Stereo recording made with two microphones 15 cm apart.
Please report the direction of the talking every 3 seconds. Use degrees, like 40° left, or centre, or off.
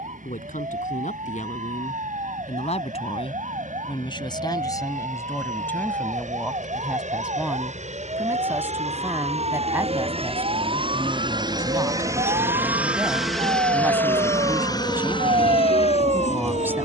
60° left, 30° left, 10° right, 10° right, 10° right, 10° right.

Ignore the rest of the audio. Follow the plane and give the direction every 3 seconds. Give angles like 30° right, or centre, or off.
70° right, 70° right, 60° right, 40° right, centre, 40° left.